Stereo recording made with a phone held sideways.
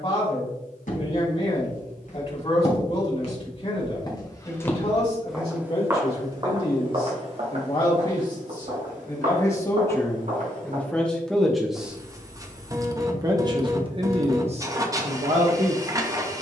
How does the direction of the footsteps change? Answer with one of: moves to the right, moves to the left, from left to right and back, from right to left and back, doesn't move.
moves to the right.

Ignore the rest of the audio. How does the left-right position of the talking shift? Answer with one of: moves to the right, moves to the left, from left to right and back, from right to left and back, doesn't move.
moves to the right.